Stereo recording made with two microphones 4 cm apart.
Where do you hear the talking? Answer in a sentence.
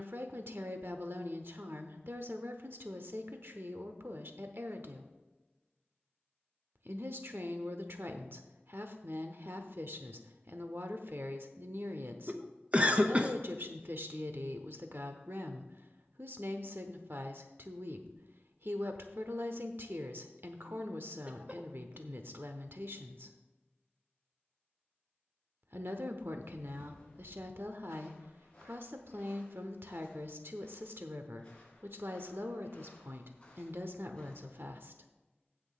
You can hear the talking on the right.